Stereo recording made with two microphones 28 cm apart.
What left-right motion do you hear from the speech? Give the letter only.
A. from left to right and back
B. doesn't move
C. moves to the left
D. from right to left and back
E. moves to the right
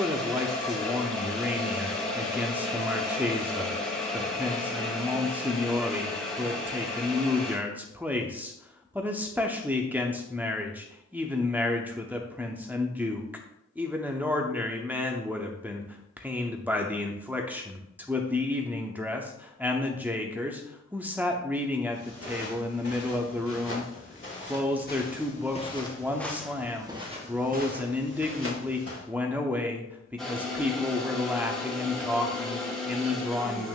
B.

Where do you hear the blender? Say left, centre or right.
centre.